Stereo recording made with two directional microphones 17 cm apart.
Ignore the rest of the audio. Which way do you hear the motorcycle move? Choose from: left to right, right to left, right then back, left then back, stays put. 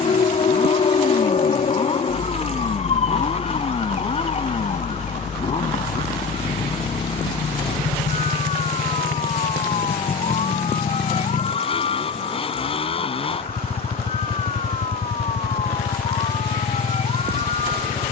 stays put.